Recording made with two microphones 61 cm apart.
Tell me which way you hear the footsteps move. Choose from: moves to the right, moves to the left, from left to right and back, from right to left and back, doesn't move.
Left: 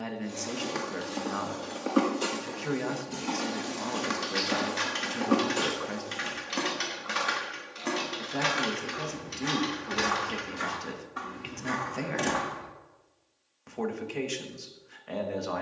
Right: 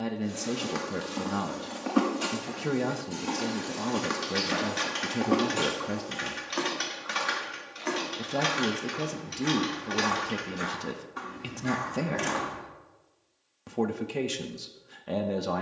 from right to left and back.